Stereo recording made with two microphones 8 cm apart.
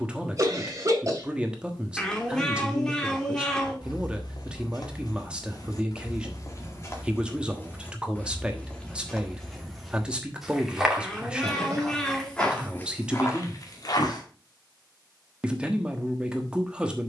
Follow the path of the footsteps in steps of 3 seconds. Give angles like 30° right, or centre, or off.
off, 60° left, 30° left, centre, 30° left, off.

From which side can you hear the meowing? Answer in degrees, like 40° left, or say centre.
10° left.